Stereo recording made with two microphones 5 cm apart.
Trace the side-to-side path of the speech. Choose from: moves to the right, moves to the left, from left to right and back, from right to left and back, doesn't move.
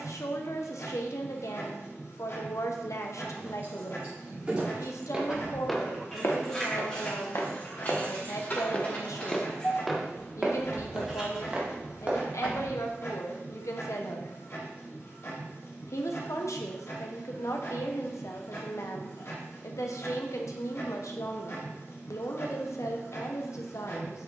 doesn't move.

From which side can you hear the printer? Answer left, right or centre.
left.